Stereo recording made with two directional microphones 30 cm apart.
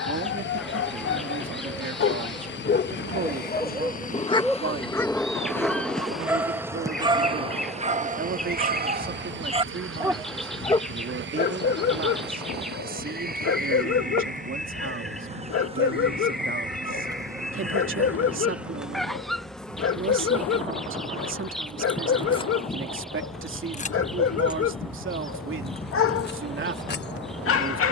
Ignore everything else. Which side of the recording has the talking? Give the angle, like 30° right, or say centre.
40° right.